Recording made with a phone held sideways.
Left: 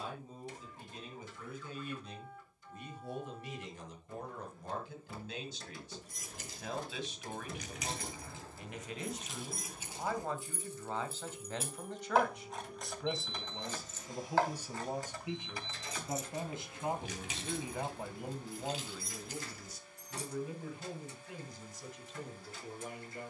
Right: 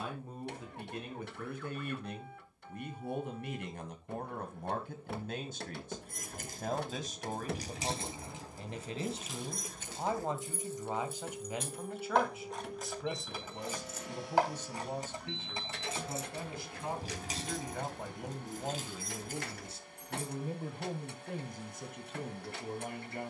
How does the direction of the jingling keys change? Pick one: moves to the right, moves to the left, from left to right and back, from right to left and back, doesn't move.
from right to left and back.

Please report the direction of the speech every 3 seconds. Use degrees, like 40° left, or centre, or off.
70° right, 60° right, 40° right, 20° right, centre, 20° left, 20° right, 60° right.